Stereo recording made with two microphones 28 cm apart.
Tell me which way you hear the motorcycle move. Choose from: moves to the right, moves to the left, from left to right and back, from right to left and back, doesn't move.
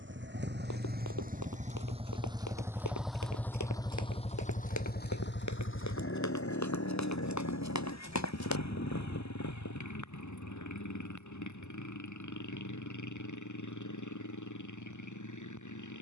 moves to the left.